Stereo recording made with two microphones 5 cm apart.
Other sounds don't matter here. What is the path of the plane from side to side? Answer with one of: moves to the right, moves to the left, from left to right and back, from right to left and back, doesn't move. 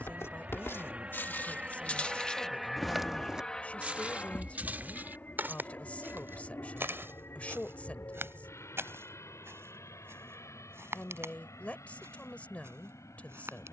moves to the left.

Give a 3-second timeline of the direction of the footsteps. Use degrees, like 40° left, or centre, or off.
40° left, 30° right, 60° right, 60° right, 70° right.